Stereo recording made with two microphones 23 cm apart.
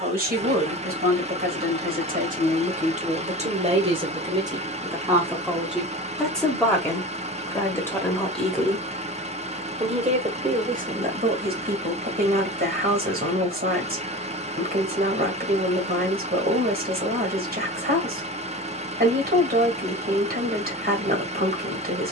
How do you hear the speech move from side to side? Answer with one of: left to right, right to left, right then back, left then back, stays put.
left then back.